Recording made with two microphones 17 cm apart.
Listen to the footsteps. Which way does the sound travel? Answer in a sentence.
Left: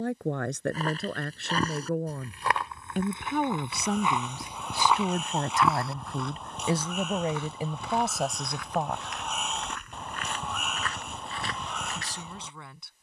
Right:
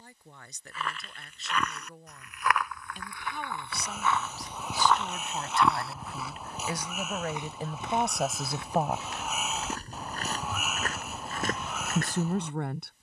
In this clip you hear the footsteps go from the left side to the right.